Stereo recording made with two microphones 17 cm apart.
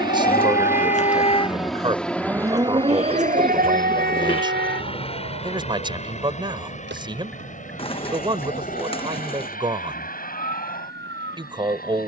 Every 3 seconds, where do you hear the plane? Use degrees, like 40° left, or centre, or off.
centre, 30° left, 40° left, 50° left.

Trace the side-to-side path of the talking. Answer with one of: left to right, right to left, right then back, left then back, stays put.
stays put.